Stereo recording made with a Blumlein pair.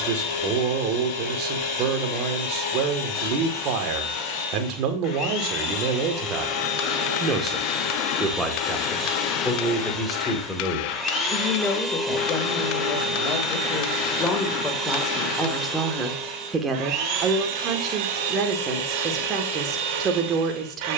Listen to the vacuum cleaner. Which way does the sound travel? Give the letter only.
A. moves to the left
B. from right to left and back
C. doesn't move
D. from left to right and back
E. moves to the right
E.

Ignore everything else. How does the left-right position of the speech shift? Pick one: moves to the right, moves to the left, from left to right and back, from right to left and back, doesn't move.
from right to left and back.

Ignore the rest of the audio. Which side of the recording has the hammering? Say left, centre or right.
left.